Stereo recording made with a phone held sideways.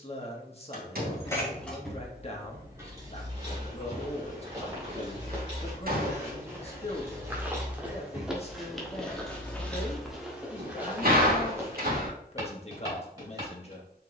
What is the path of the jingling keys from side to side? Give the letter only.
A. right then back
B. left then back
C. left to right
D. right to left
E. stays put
A.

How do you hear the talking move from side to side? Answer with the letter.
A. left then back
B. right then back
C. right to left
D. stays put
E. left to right
D.